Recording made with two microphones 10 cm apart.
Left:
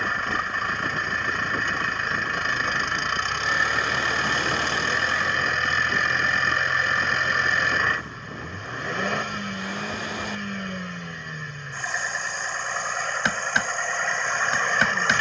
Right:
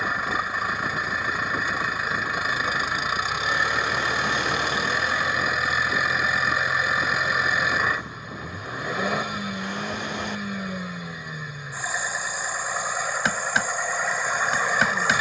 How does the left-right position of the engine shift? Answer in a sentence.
In this clip you hear the engine stay put.